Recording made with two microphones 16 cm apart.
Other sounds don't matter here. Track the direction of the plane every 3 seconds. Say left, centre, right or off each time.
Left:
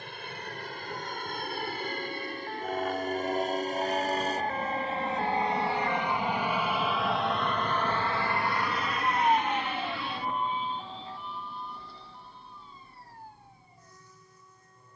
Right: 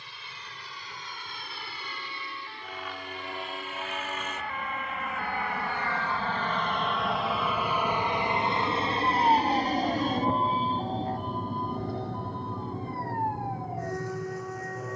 left, left, centre, right, right.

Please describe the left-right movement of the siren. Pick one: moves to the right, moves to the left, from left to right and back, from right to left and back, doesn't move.
moves to the right.